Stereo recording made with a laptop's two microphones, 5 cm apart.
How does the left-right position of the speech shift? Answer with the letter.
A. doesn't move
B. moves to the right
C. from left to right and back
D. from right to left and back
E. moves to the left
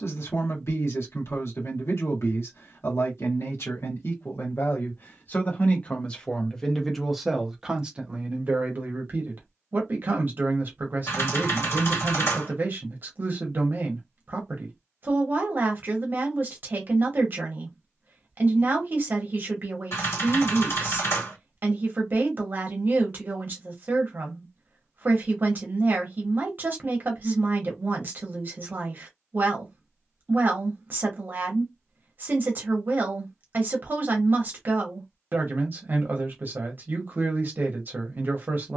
B.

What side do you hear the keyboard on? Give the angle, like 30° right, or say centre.
60° left.